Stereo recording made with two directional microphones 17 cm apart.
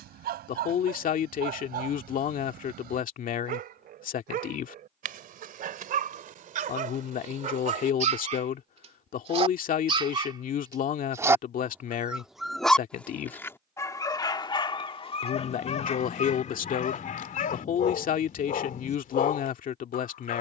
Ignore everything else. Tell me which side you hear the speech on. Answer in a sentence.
In this clip you hear the speech on the left.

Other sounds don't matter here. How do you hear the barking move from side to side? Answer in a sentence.
You can hear the barking go from the right side to the left.